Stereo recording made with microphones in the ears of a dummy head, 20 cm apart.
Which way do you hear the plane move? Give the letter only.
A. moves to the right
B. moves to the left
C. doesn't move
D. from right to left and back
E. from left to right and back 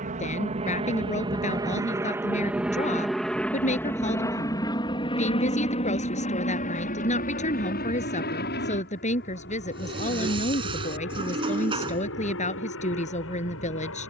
B.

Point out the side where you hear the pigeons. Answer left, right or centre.
right.